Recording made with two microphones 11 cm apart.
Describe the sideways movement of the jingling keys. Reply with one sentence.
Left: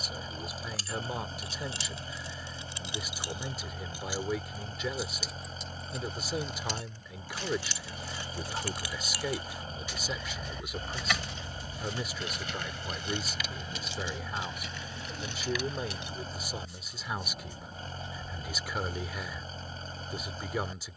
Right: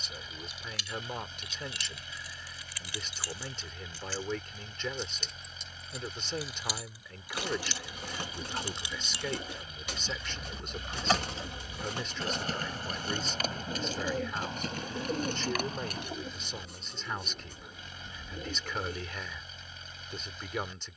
You can hear the jingling keys move from left to right.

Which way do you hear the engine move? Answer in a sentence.
You can hear the engine stay in one place.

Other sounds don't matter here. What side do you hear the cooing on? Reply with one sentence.
In this clip you hear the cooing on the right.